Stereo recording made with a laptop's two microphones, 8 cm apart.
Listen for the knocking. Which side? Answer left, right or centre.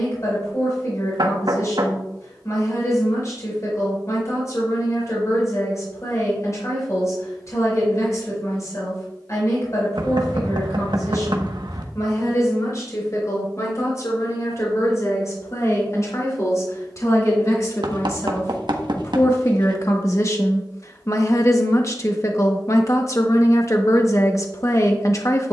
right.